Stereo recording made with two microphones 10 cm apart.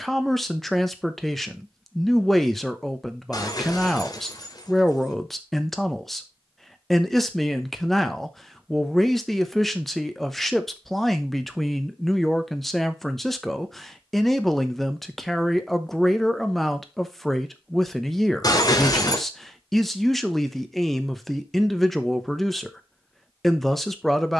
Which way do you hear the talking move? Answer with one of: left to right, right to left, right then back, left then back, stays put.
stays put.